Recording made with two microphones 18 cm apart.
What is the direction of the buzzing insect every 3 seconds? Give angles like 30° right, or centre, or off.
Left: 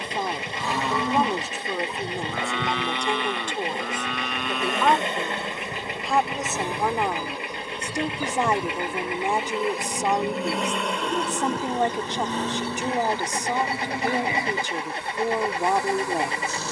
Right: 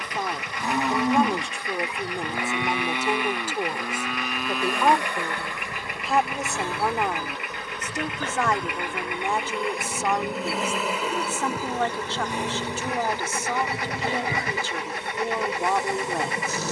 20° left, 20° left, 10° left, centre, 20° right, 20° right.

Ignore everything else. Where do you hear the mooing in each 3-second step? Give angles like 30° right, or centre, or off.
10° right, centre, 10° left, 10° left, 20° left, 20° left.